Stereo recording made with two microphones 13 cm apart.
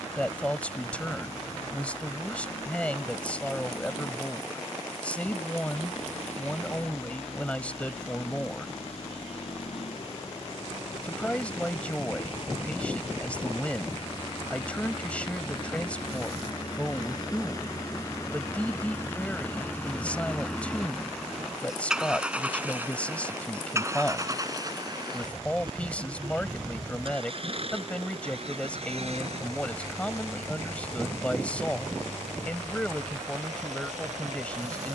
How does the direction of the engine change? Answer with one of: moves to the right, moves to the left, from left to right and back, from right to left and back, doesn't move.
moves to the right.